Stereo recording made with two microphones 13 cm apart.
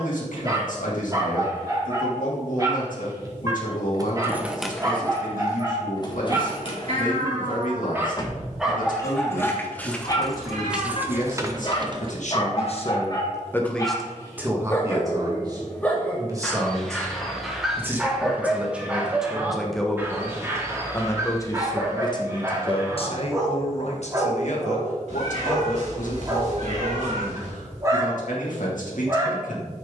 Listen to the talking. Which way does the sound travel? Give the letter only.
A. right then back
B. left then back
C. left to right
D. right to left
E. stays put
A.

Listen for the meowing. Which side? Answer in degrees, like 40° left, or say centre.
60° right.